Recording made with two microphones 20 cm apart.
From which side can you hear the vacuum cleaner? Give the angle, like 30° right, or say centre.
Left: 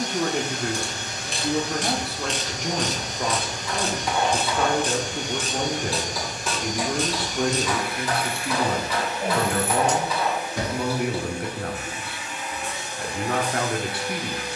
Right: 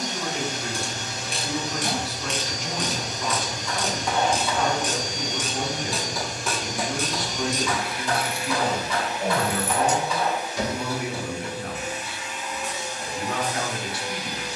60° left.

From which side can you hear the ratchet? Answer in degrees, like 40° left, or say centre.
10° right.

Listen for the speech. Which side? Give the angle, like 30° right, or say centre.
60° left.